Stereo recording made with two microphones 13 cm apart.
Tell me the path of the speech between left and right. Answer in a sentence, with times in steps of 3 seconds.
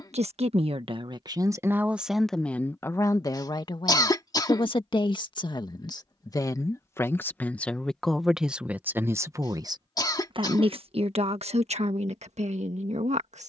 You can hear the speech on the right from 0 s, on the left from 3 s, in the centre from 6 s and on the right from 9 s.